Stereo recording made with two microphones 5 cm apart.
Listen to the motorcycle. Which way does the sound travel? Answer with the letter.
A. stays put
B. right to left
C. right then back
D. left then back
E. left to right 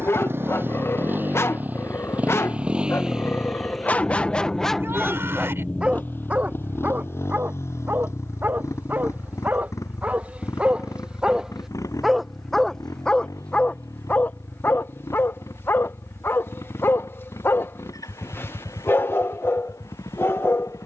B.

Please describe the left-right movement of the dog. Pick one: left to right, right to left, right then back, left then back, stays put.
right then back.